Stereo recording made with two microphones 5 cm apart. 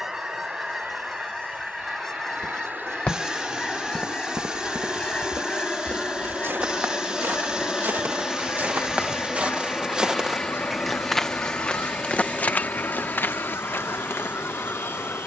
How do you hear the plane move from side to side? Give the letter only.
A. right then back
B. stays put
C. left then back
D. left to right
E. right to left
E.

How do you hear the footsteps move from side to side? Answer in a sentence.
You can hear the footsteps move from left to right and back again.